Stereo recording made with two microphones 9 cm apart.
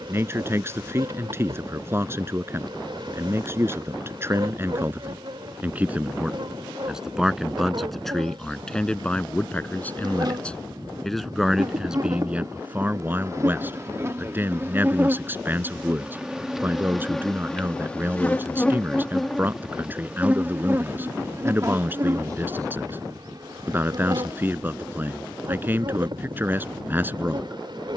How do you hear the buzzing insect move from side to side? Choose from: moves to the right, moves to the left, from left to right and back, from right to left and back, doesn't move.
from right to left and back.